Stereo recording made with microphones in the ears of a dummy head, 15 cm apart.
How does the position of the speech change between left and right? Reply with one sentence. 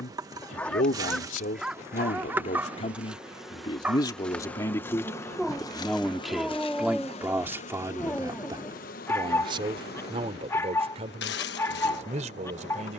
In this clip you hear the speech move from left to right.